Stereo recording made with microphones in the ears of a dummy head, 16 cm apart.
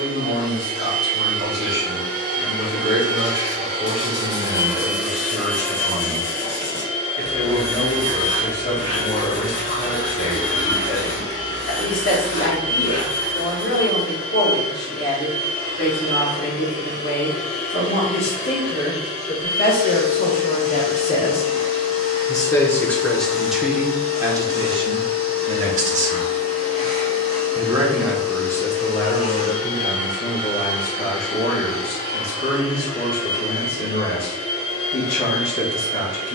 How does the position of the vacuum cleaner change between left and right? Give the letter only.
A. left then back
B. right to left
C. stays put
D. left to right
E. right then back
B.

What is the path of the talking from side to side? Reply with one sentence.
You can hear the talking go right and come back.